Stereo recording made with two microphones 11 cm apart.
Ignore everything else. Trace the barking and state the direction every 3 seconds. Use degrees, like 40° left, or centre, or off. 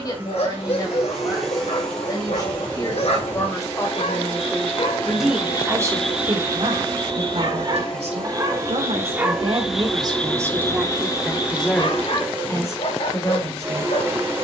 70° left, 60° left, 30° right, 20° left, 60° left.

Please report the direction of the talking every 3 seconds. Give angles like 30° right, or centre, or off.
40° left, 10° left, 70° right, 20° right, 30° left.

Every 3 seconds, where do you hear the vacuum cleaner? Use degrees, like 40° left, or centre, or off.
centre, 20° left, 10° left, centre, 20° right.